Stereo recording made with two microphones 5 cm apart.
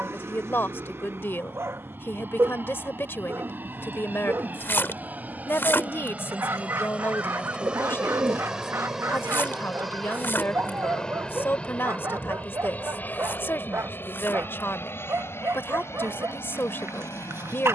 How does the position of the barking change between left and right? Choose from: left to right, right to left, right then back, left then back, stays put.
stays put.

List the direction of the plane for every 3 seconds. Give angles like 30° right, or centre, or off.
50° right, 40° right, 20° right, 10° left, 40° left, 60° left.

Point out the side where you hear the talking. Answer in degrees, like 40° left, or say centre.
50° left.